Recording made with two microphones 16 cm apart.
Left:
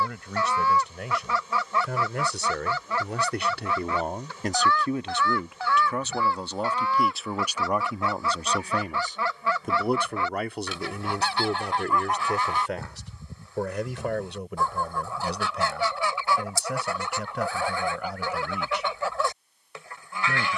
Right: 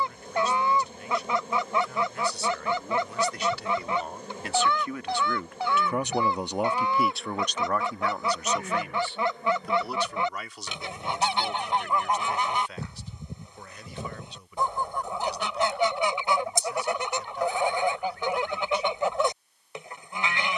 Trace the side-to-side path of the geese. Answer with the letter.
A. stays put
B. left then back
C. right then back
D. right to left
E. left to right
A.